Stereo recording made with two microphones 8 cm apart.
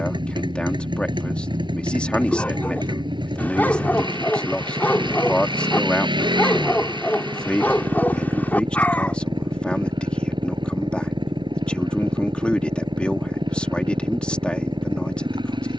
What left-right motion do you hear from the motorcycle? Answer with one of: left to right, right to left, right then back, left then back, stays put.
stays put.